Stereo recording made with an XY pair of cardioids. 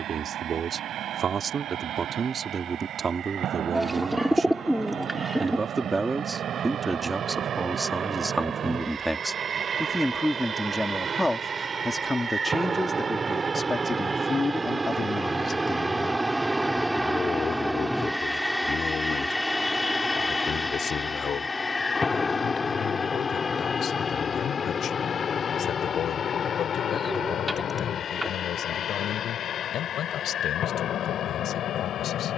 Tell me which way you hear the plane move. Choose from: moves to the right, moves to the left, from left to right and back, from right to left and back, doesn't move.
moves to the left.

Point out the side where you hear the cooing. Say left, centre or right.
centre.